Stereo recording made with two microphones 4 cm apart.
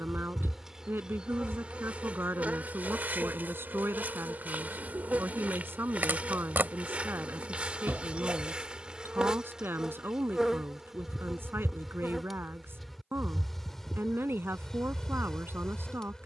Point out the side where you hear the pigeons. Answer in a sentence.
You can hear the pigeons on the right.